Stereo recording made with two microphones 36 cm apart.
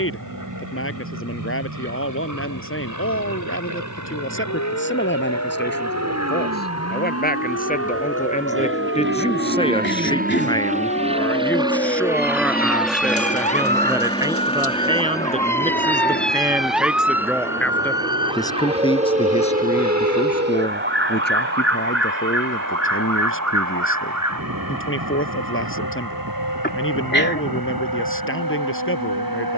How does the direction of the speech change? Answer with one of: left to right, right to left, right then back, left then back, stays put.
right then back.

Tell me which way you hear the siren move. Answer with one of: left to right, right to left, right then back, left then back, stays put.
left to right.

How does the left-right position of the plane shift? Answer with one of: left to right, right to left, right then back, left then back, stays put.
right to left.